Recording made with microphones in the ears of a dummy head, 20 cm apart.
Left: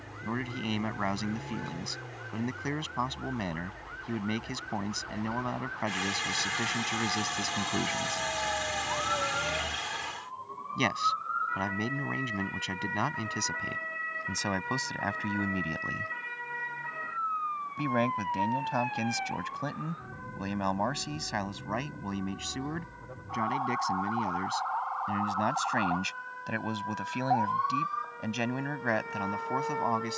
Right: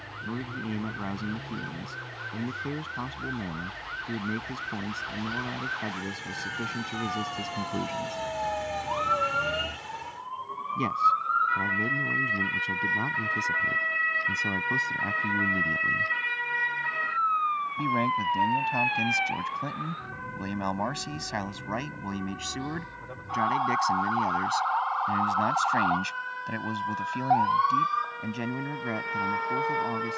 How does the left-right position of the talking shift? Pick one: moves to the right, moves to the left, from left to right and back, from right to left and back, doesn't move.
from left to right and back.